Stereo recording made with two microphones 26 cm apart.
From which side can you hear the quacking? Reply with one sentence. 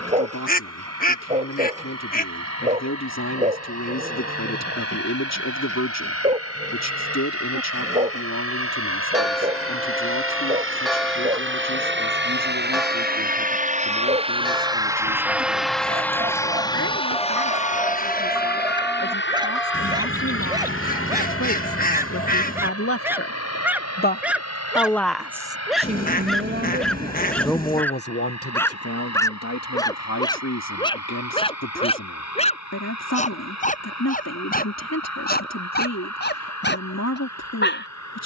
In this clip you hear the quacking on the left.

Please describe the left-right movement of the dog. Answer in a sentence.
In this clip you hear the dog move to the left.